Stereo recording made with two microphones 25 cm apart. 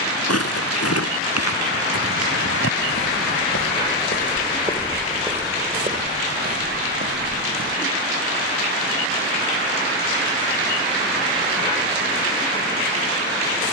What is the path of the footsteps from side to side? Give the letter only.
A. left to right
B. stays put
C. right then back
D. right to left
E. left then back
A.